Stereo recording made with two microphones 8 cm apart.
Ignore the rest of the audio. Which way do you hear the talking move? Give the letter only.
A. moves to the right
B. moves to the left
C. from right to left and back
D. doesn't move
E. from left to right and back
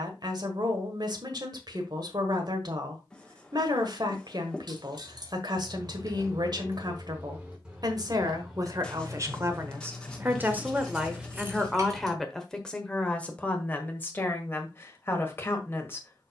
B.